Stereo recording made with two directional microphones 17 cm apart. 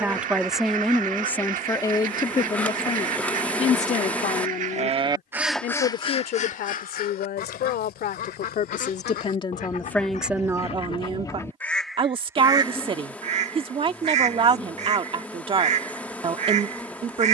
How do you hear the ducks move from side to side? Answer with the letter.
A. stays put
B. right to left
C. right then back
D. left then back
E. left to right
D.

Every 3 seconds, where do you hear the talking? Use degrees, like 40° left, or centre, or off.
10° left, 50° left, 60° left, centre, 30° right, 30° right.